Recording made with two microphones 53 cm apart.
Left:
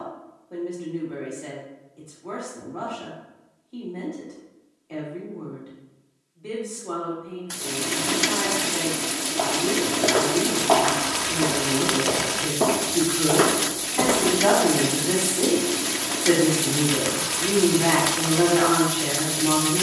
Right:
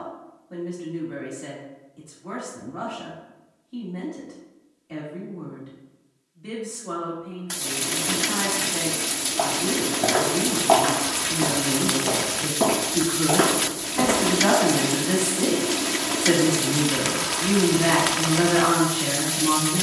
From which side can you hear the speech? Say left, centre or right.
right.